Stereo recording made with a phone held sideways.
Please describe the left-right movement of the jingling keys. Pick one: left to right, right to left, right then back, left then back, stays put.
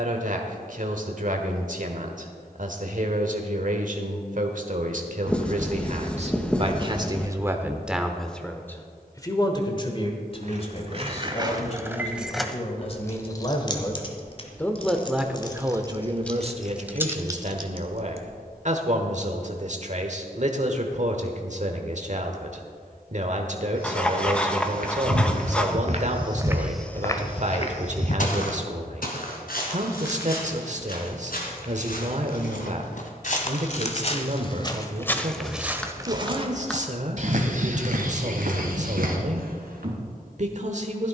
left then back.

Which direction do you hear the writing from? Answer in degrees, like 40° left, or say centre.
10° left.